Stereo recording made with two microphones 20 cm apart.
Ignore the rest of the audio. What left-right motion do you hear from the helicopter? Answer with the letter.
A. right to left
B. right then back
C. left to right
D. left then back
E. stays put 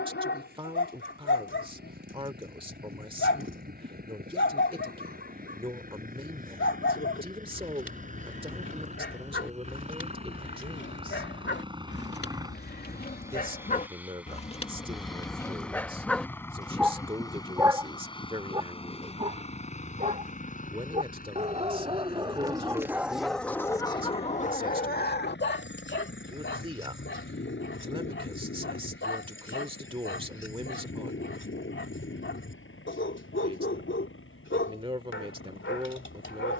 A.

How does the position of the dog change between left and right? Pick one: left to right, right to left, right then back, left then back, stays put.
right then back.